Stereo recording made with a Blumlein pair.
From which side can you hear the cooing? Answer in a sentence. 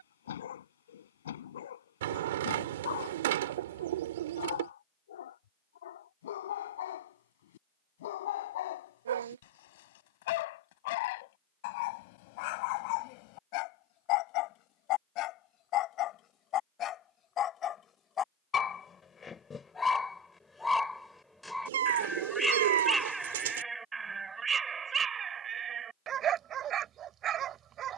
In this clip you hear the cooing on the right.